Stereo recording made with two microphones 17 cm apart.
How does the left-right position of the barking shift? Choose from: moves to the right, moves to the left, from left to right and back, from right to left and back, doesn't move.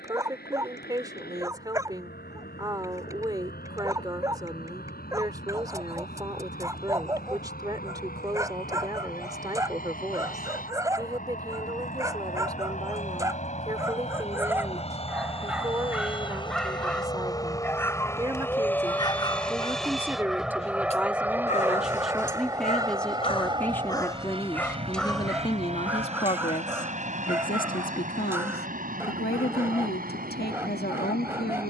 from right to left and back.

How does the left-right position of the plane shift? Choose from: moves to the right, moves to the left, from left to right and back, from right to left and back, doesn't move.
moves to the right.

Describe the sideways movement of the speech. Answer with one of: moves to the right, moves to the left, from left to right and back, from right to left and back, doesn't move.
moves to the left.